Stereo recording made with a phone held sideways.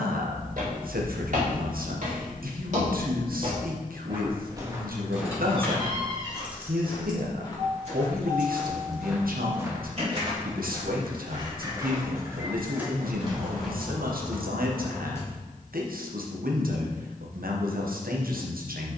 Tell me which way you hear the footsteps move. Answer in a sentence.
You can hear the footsteps move from right to left and back again.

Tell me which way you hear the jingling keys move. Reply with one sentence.
You can hear the jingling keys move from left to right and back again.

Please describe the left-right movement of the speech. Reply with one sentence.
In this clip you hear the speech stay put.